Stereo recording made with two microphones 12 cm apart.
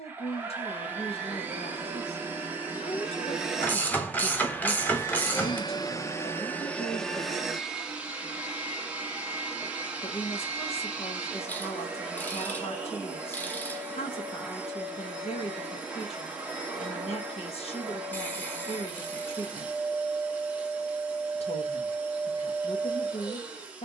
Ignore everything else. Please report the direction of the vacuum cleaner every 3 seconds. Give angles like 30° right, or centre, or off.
20° right, 20° left, centre, 10° right, 10° right, 10° right, 10° right, 10° right.